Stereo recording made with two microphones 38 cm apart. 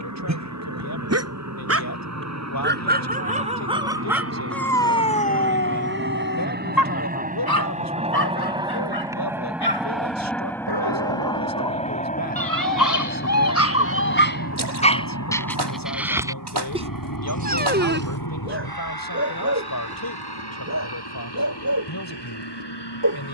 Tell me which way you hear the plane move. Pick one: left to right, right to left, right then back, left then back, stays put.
right to left.